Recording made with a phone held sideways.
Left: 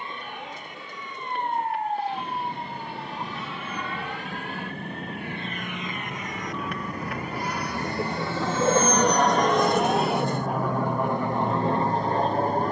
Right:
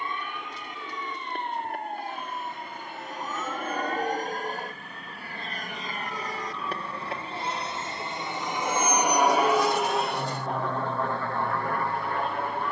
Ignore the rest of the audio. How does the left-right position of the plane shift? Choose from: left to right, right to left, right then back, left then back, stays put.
right to left.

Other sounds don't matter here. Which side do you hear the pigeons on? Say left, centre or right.
left.